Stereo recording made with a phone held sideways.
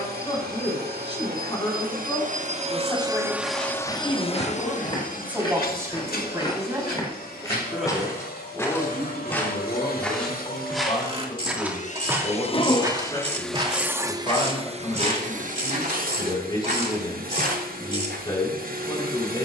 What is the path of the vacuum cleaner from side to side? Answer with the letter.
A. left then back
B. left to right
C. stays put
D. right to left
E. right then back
A.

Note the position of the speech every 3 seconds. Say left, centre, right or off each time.
left, centre, centre, left, left, left, left.